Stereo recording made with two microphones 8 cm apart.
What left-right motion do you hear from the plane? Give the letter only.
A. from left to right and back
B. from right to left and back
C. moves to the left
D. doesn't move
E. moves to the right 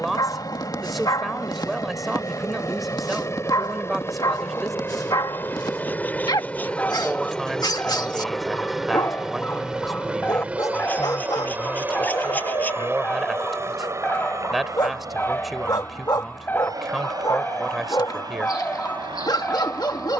E.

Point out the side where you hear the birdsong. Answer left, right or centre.
left.